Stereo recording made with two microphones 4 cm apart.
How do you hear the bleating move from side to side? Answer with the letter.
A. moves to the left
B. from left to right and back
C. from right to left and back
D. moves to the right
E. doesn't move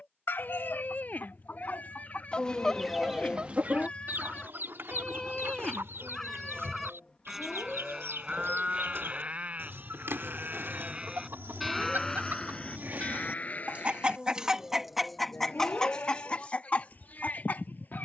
B.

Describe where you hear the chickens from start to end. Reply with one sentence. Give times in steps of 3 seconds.
In this clip you hear the chickens on the left from 0 s, on the right from 3 s and on the left from 15 s.